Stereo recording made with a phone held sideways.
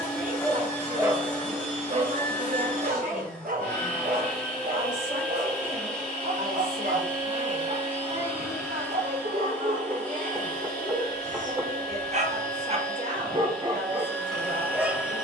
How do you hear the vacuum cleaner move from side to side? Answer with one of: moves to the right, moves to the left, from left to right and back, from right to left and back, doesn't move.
doesn't move.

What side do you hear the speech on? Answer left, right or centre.
right.